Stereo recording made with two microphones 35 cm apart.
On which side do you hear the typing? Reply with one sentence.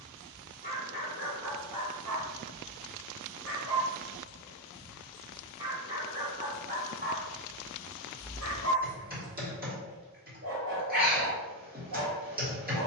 You can hear the typing on the right.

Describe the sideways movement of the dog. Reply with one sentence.
You can hear the dog go from the left side to the right.